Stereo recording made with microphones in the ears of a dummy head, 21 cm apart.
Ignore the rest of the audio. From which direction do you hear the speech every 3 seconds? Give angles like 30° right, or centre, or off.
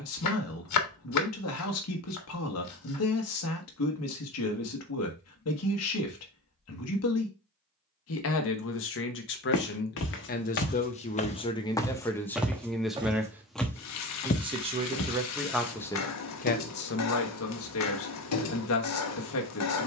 60° left, 60° left, 60° left, 30° left, 10° right, 30° left, 60° left.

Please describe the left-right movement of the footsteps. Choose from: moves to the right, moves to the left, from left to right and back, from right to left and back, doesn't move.
from left to right and back.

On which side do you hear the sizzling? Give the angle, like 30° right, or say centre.
70° left.